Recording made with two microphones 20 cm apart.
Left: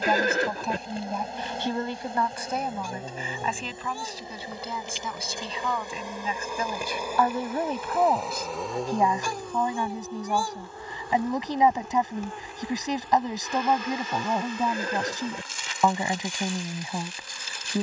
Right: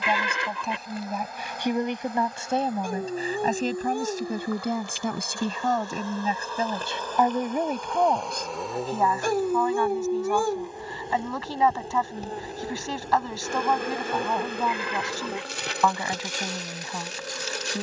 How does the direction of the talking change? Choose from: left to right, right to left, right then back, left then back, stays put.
right then back.